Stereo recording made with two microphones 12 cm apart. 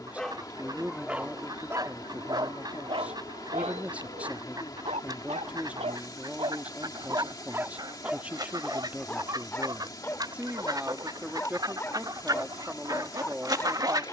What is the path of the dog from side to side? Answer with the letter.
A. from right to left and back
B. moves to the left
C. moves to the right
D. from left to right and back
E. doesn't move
D.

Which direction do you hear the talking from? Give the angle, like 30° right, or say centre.
10° right.